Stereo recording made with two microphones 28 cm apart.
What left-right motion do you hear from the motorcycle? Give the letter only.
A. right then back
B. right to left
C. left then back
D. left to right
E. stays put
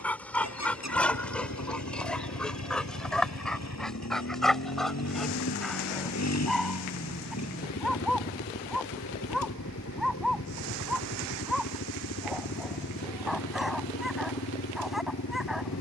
E.